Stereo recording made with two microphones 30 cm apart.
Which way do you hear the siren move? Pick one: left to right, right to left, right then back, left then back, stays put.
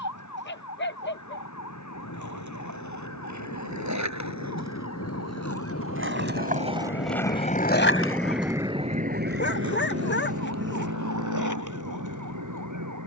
left to right.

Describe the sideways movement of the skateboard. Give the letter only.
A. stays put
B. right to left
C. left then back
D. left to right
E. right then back
B.